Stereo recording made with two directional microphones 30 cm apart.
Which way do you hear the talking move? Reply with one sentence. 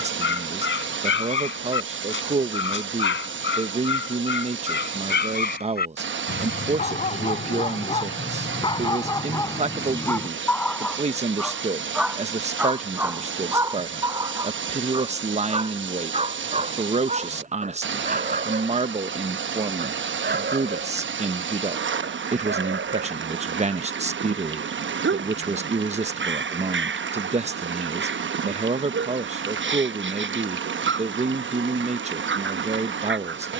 You can hear the talking stay in one place.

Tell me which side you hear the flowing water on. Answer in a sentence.
In this clip you hear the flowing water on the right.